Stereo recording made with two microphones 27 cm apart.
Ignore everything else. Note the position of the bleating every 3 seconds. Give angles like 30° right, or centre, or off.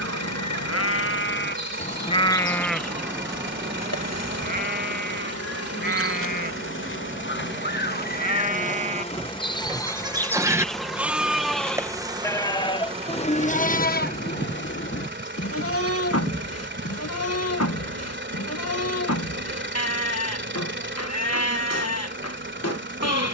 40° left, 30° right, 30° right, 10° right, 30° left, 60° left, 70° left, 70° left.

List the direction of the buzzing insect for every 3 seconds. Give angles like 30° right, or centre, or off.
80° left, 60° left, 40° left, centre, 20° right, 40° right, 50° right, 50° right.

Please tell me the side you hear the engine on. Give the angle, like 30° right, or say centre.
40° right.